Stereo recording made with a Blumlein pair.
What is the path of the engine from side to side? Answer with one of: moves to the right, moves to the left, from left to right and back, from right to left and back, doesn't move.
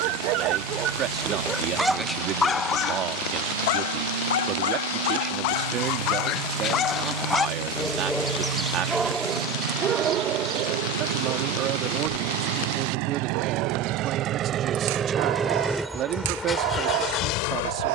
moves to the left.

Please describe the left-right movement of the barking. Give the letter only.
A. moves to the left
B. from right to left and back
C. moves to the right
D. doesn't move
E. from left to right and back
B.